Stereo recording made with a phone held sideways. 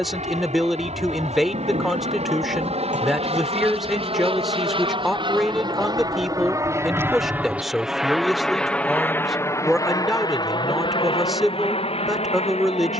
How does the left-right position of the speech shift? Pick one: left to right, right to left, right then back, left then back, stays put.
stays put.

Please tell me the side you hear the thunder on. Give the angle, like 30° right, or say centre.
80° right.